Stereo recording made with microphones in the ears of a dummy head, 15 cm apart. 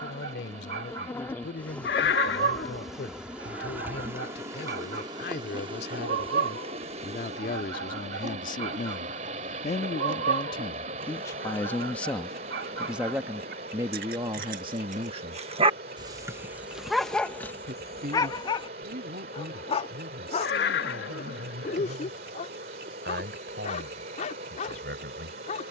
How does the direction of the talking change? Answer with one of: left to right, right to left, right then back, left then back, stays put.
left to right.